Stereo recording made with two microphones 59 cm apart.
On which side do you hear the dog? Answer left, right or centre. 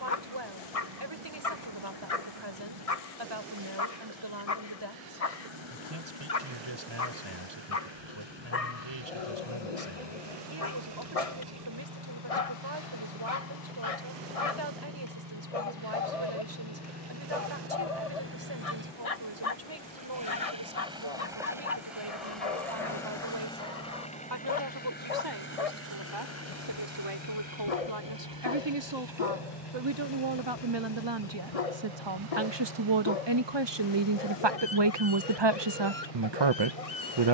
left.